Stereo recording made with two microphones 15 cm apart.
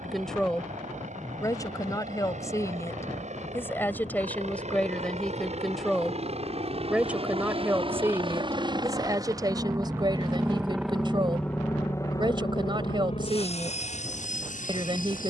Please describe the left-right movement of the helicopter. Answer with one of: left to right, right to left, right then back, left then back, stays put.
right to left.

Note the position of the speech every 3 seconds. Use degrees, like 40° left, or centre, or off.
20° left, 10° left, 10° right, 30° right, 30° right.